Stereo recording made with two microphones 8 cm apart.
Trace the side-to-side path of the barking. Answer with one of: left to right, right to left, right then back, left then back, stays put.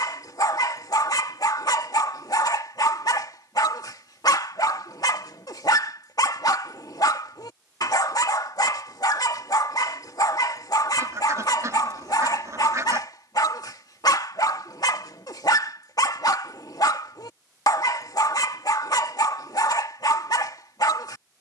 stays put.